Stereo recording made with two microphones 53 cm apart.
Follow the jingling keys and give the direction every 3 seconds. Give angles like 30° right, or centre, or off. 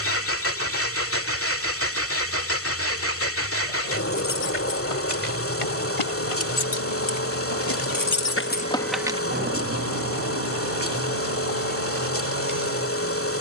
off, 80° left, 50° left, 40° right, 60° right.